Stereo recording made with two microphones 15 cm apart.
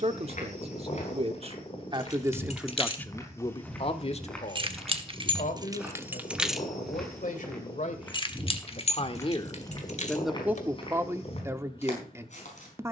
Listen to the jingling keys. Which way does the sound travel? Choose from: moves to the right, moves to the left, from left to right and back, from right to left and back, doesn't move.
from left to right and back.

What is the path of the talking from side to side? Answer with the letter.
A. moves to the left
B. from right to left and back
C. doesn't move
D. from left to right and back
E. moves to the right
B.